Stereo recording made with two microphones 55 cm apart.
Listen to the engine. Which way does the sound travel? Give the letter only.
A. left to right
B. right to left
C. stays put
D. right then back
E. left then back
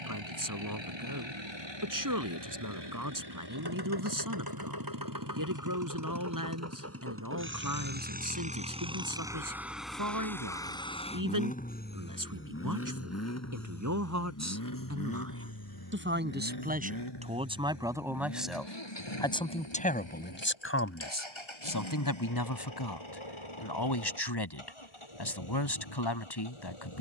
B.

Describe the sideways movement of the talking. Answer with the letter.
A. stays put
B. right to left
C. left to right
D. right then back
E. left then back
B.